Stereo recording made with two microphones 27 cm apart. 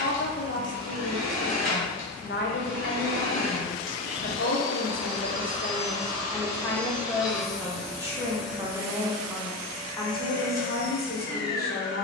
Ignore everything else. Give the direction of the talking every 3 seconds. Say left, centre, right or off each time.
left, left, centre, left.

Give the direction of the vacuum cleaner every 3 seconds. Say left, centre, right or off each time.
right, right, centre, right.